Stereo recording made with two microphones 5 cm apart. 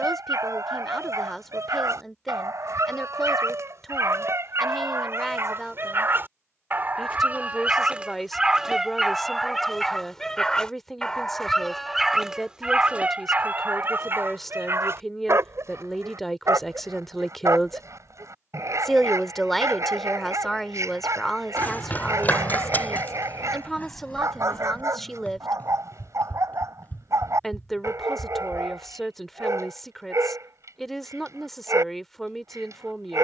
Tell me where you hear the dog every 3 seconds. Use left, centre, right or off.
right, right, right, centre, right, right, right, right, right, right, right.